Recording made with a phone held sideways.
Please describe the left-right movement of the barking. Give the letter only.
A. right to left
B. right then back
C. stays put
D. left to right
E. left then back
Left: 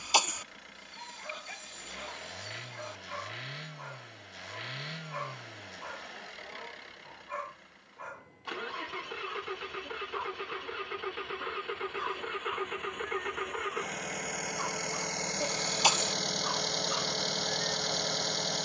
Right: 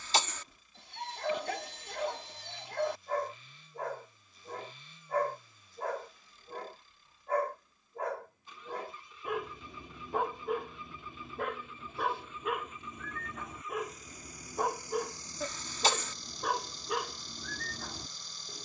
C.